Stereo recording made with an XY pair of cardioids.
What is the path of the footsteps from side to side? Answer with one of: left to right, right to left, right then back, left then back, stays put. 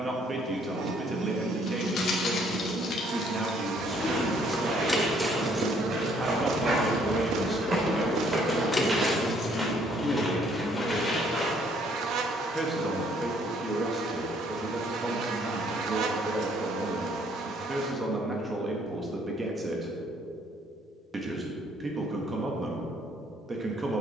right to left.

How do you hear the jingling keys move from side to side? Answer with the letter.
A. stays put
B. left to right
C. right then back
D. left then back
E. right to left
C.